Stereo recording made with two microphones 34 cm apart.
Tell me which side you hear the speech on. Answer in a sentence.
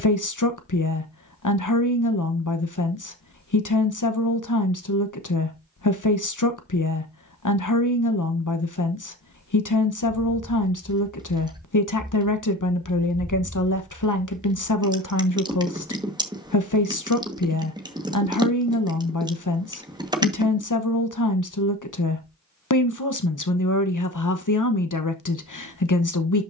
In this clip you hear the speech on the left.